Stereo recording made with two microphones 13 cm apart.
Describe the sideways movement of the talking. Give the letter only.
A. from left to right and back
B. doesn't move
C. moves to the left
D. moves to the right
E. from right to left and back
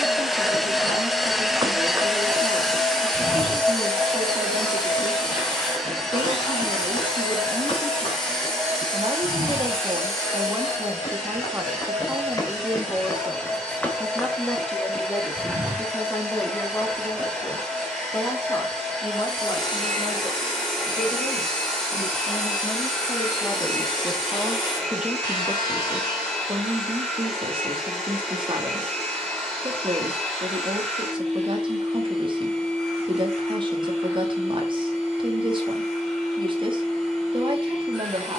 E.